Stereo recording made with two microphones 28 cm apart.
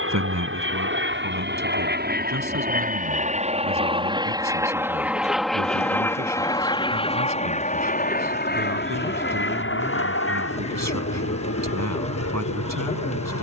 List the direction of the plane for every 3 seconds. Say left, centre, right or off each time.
right, centre, left, left, left.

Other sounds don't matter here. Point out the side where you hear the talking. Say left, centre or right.
right.